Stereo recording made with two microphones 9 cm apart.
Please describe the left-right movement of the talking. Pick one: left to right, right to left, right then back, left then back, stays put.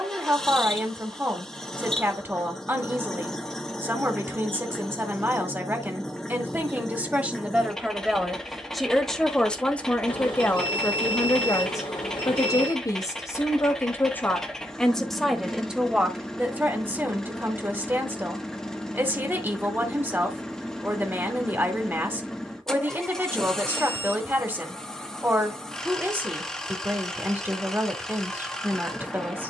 left then back.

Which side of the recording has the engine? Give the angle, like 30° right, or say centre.
10° left.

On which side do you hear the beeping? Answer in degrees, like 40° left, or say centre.
70° left.